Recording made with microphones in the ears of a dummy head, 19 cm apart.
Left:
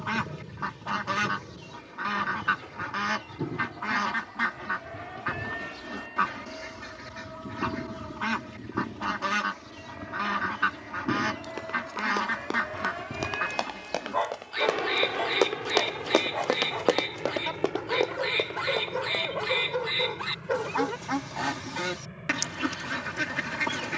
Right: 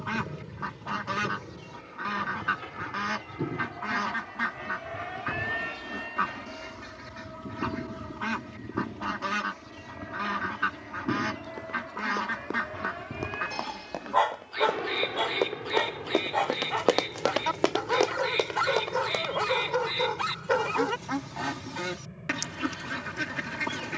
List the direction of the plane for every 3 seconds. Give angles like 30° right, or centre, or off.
50° right, 40° right, 20° right, centre, 20° left, 30° left, 40° left, 50° left.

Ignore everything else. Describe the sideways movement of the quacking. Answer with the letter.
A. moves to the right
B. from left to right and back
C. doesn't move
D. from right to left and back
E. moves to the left
C.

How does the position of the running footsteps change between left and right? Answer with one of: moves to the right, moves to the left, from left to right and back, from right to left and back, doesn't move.
moves to the right.